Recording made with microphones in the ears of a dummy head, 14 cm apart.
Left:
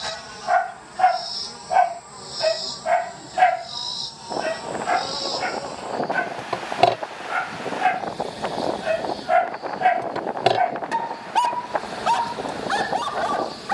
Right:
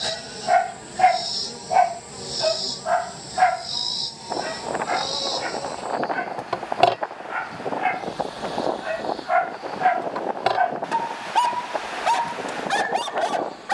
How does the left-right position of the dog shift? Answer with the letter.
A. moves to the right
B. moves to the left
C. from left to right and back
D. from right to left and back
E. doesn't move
D.